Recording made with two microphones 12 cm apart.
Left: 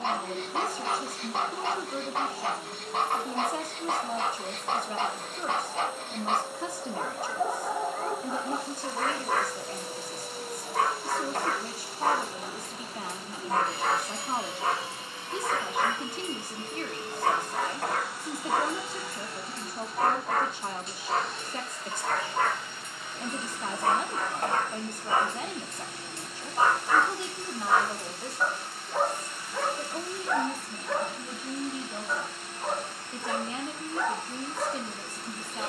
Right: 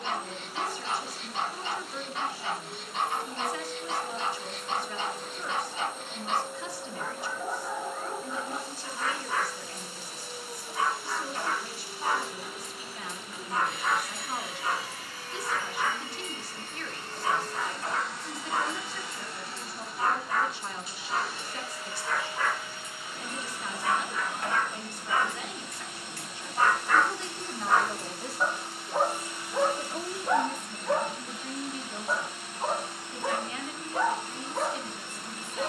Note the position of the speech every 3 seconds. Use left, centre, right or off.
left, left, left, left, left, left, left, left, left, centre, centre, left.